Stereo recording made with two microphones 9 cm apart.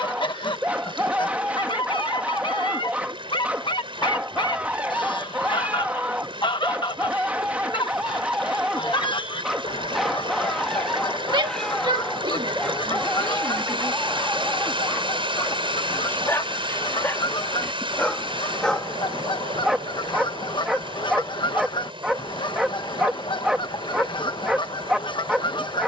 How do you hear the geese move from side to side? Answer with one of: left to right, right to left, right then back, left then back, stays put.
stays put.